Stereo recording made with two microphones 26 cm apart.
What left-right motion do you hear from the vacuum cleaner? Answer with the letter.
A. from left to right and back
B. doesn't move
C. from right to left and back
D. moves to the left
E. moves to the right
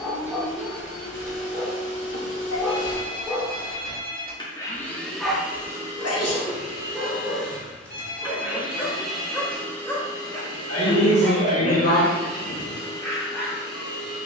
A.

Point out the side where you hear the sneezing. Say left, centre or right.
left.